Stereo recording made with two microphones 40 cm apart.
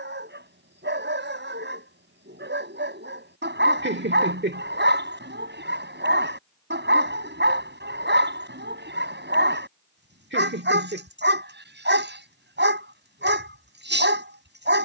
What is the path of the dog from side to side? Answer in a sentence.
You can hear the dog stay in one place.